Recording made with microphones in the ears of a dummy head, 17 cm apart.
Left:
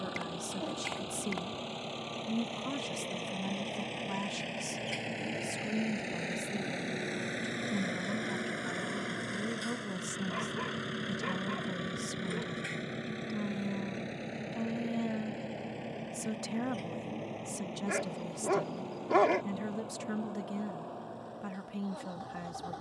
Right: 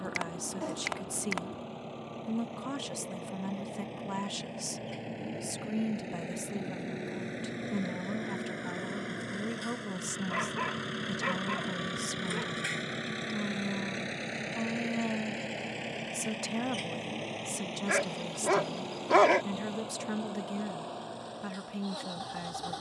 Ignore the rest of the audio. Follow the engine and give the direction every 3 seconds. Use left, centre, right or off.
left, left, left, centre, right, right, right, right.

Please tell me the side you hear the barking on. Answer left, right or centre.
right.